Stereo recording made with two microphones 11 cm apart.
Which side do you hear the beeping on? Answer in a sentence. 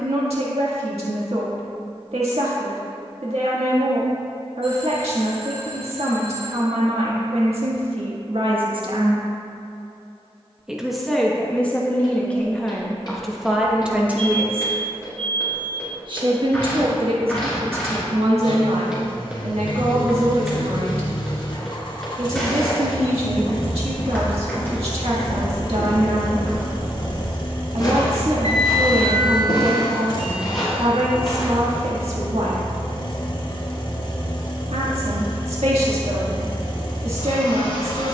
In this clip you hear the beeping on the right.